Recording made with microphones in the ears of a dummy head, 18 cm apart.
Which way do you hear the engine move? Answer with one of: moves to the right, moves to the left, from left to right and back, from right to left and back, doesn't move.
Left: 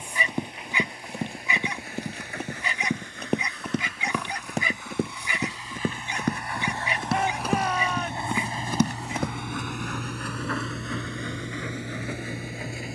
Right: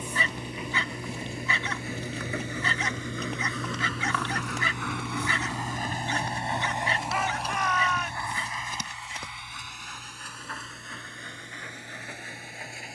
moves to the left.